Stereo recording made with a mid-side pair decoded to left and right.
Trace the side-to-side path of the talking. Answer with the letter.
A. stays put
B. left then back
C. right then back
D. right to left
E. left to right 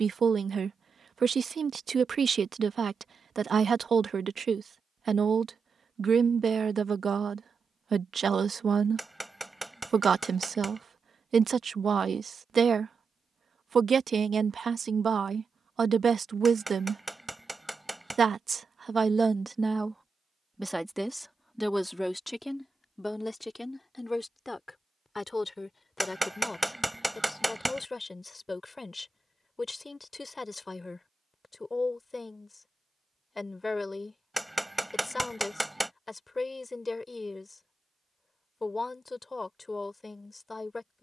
D.